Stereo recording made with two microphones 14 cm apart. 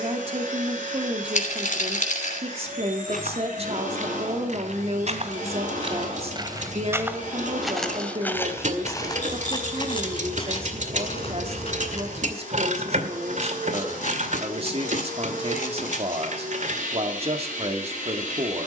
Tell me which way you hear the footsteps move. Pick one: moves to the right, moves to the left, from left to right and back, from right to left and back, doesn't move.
moves to the left.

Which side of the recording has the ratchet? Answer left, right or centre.
right.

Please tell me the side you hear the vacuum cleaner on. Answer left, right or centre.
right.